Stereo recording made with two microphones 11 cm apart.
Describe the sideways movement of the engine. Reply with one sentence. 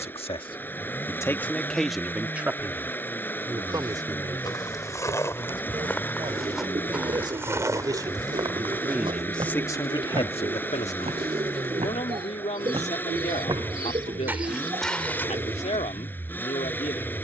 You can hear the engine stay put.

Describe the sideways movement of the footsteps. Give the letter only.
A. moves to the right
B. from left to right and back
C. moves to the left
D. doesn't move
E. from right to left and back
B.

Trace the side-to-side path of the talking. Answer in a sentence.
In this clip you hear the talking go right and come back.